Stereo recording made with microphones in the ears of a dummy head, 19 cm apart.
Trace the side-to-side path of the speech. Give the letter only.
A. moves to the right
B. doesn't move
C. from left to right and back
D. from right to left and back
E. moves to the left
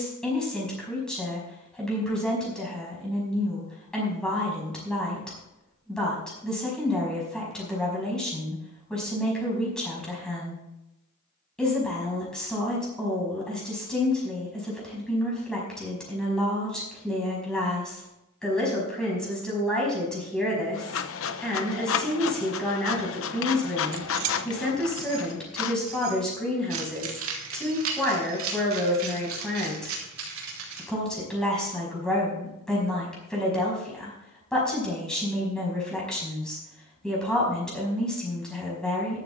B.